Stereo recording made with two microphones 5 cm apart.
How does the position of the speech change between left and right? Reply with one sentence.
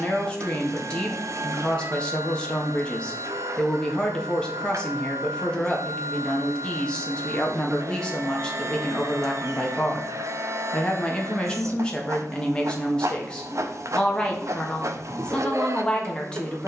You can hear the speech stay in one place.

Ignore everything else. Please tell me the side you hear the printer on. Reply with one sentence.
In this clip you hear the printer on the right.